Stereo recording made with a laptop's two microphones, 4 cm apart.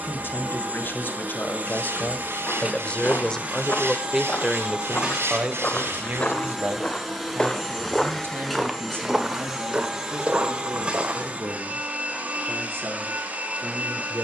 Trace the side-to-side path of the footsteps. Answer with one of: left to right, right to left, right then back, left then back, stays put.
left to right.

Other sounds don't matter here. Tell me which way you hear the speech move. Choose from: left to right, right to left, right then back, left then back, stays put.
left to right.